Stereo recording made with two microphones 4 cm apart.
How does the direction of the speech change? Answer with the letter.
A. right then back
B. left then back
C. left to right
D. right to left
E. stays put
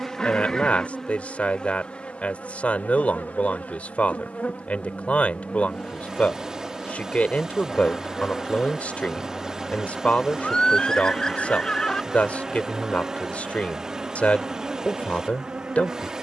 E.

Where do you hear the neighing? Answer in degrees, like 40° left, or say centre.
20° left.